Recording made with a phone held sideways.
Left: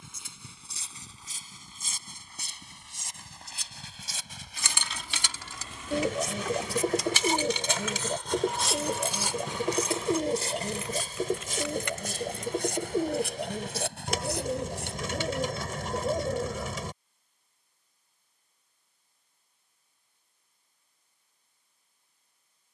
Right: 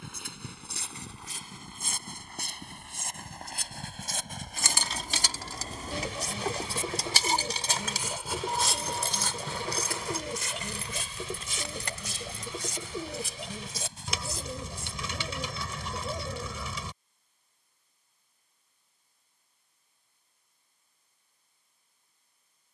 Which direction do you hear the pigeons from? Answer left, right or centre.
left.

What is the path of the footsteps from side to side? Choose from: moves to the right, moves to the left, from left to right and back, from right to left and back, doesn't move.
moves to the left.